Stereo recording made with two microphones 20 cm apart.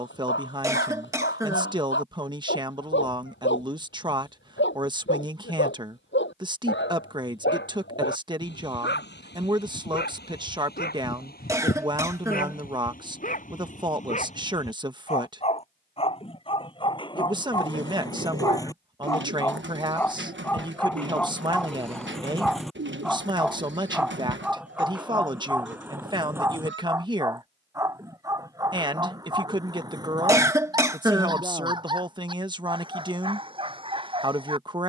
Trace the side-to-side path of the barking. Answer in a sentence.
You can hear the barking travel towards the right.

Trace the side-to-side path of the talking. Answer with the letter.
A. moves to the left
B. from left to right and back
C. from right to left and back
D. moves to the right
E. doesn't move
E.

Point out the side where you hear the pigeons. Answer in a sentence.
In this clip you hear the pigeons on the right.